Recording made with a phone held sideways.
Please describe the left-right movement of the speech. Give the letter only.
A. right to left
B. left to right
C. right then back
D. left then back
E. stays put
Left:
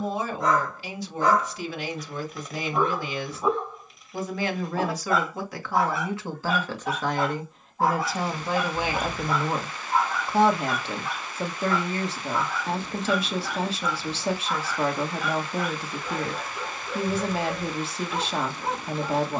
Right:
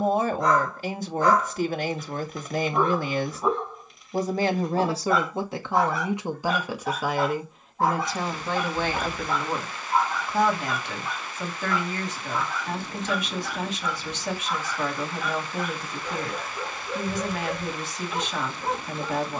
A.